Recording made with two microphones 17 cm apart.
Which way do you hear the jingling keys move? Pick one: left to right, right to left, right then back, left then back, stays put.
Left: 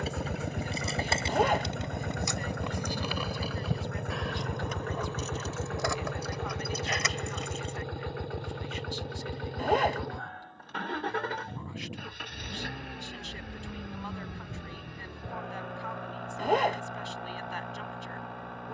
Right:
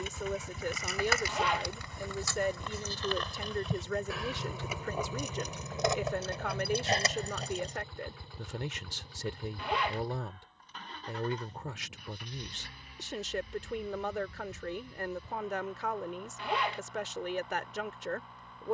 left to right.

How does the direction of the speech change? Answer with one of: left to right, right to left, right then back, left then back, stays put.
stays put.